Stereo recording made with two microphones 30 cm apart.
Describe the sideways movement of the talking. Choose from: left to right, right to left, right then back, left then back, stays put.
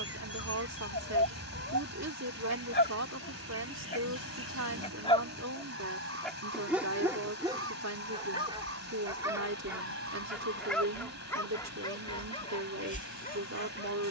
stays put.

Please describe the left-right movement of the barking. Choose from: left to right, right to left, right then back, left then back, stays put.
right then back.